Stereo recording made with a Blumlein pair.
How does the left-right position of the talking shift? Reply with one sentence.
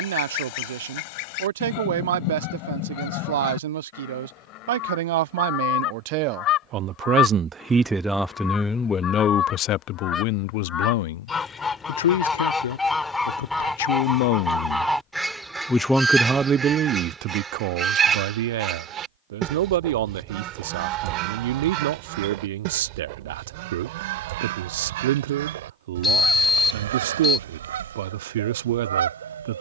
In this clip you hear the talking go left and come back.